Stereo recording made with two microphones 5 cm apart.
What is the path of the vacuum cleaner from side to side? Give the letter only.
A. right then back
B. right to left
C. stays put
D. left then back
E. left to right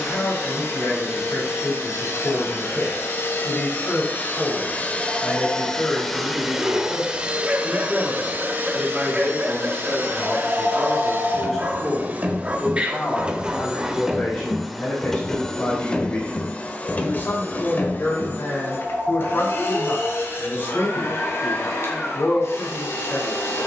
A.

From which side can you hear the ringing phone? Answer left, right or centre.
right.